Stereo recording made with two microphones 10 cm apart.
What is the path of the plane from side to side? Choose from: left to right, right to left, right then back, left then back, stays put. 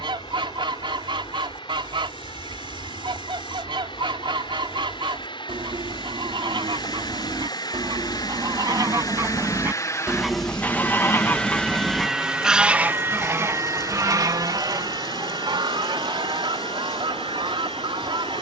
left to right.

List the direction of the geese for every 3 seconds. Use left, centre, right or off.
right, right, right, centre, right, right.